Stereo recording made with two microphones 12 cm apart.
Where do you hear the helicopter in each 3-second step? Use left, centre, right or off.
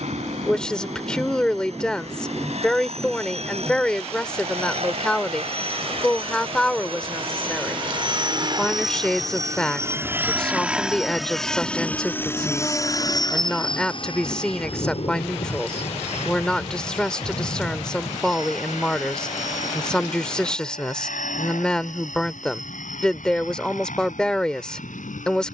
right, right, right, centre, left, left, left, left, left.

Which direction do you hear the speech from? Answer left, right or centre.
centre.